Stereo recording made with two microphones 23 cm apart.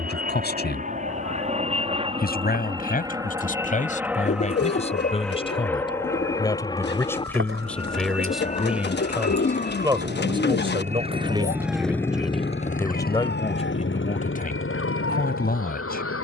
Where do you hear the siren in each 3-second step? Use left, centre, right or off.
right, right, right, right, left, left.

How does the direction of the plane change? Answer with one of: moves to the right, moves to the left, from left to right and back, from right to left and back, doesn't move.
moves to the left.